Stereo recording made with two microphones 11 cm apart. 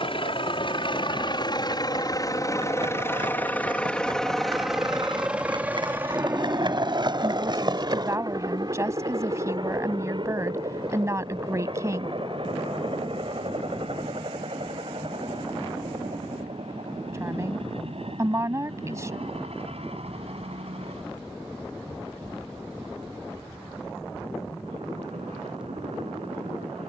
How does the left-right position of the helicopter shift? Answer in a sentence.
You can hear the helicopter move from left to right.